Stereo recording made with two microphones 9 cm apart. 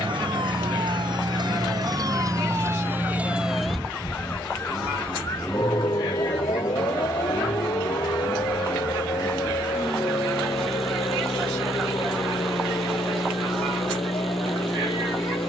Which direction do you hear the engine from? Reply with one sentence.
You can hear the engine in the centre.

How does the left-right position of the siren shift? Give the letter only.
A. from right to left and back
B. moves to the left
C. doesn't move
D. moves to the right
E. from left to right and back
B.